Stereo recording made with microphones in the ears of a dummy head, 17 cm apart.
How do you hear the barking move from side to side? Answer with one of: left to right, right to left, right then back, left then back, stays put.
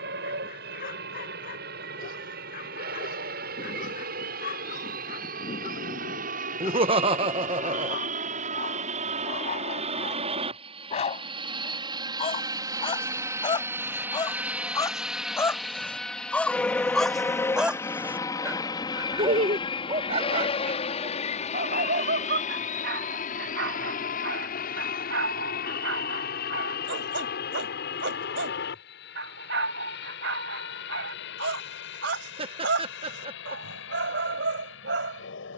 left to right.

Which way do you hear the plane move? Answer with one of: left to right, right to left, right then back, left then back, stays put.
right to left.